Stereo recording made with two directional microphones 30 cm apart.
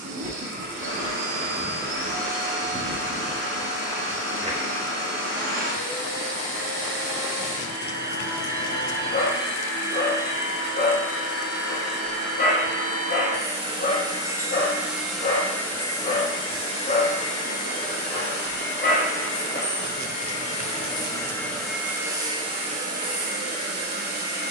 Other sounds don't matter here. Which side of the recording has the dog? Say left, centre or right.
left.